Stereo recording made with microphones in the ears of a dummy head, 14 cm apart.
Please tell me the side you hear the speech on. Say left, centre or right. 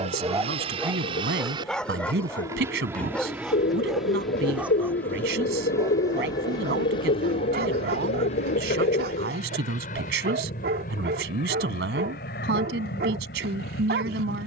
right.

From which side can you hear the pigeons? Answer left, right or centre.
left.